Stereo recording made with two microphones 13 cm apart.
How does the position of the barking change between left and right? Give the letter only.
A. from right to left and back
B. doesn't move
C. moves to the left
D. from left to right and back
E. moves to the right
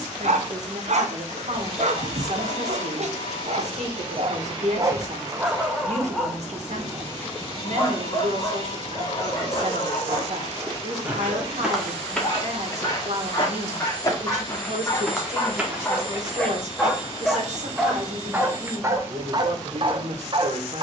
A.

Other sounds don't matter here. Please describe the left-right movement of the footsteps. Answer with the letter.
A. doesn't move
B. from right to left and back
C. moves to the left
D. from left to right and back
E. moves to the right
B.